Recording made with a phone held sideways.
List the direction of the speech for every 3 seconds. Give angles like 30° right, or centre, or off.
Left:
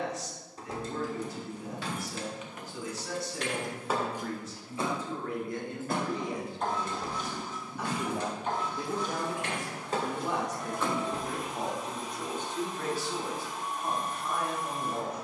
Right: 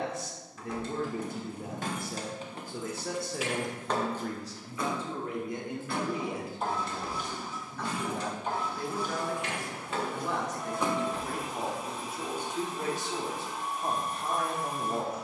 50° right, 30° right, 10° left, 10° left, 20° right.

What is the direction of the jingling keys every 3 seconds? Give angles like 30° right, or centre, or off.
40° right, 10° left, 50° left, 20° left, off.